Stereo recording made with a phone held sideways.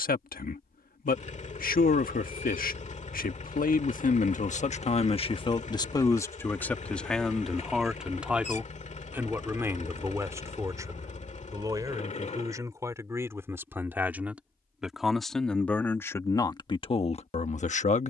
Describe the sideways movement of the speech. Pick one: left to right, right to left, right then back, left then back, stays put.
right then back.